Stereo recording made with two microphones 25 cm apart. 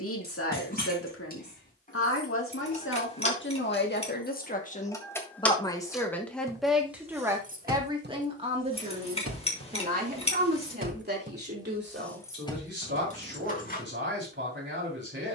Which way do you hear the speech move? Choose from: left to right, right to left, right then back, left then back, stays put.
left to right.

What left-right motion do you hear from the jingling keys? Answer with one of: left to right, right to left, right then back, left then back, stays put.
right then back.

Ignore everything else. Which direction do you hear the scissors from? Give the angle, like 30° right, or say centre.
20° left.